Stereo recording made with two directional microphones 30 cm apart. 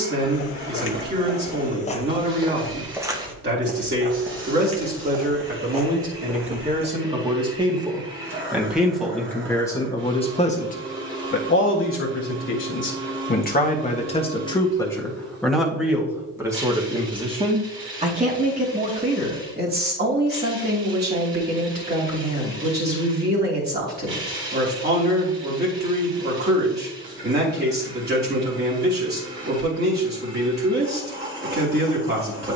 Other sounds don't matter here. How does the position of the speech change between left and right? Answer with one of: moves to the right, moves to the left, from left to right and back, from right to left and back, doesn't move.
from right to left and back.